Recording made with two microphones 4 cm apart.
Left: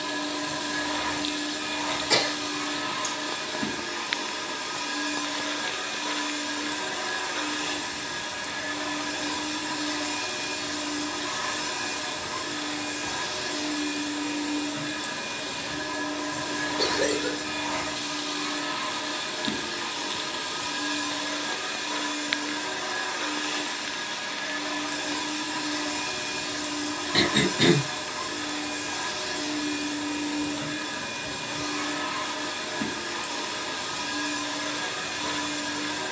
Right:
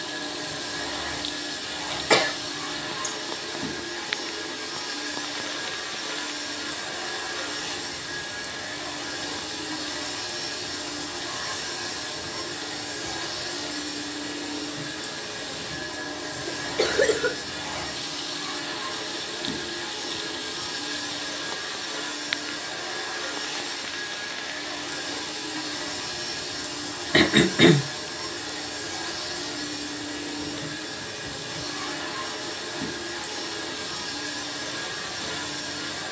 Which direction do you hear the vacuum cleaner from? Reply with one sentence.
In this clip you hear the vacuum cleaner on the left.